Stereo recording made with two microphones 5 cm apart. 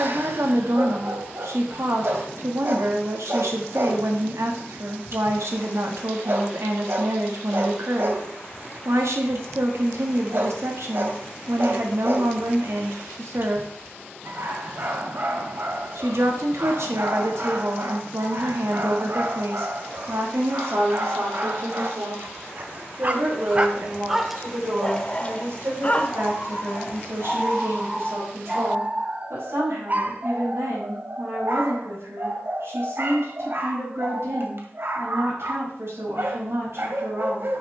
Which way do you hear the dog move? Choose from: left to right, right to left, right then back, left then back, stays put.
left then back.